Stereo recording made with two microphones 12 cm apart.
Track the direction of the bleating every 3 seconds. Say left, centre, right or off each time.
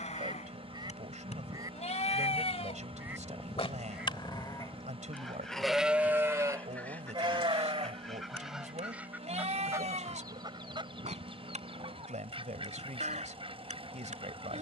left, left, right, right, right.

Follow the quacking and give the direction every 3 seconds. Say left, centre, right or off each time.
right, centre, centre, right, right.